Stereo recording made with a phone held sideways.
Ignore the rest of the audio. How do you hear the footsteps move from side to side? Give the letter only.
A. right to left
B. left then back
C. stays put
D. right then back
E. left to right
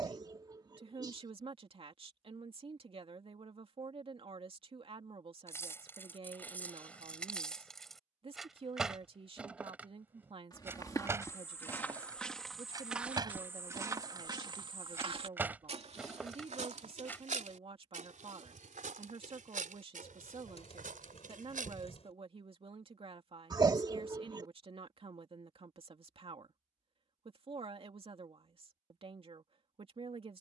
E.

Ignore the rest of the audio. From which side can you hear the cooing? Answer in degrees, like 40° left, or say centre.
50° left.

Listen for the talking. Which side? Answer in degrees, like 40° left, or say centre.
40° right.